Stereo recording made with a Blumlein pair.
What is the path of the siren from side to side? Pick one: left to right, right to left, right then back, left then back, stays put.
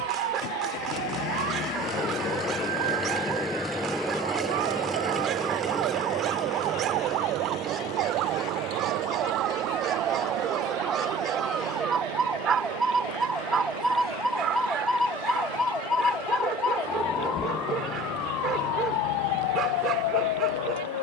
right to left.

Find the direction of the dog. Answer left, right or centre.
right.